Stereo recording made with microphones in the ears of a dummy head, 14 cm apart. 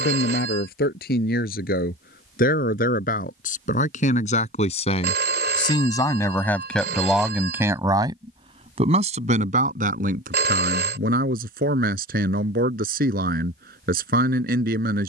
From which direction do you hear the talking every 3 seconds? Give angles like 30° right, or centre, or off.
60° left, 50° left, 10° right, 60° right, 60° right.